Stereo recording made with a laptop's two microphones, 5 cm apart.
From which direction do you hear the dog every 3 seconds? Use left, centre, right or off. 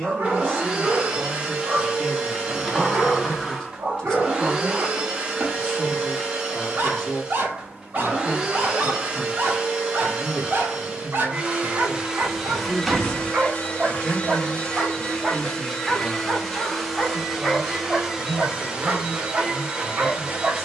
right, right, right, right, right, centre, right.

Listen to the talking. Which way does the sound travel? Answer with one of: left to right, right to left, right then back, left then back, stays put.
left to right.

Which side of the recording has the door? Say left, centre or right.
centre.